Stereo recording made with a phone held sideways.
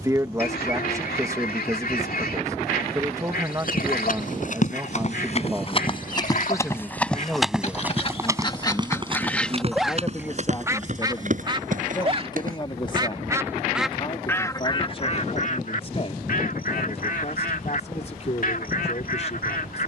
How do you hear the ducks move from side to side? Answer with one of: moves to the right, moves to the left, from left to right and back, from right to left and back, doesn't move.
from left to right and back.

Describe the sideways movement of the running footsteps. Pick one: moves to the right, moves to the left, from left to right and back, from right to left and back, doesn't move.
moves to the right.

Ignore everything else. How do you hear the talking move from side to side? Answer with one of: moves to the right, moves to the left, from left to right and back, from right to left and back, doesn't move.
moves to the left.